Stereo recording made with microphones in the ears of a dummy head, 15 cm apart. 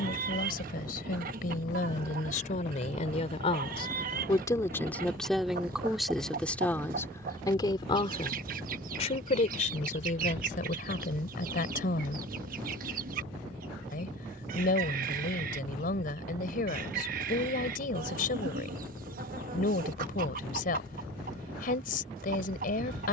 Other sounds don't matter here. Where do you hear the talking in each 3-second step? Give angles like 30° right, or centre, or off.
50° left, 20° left, 20° left, 50° left, 50° left, 50° left, 50° left, 50° left.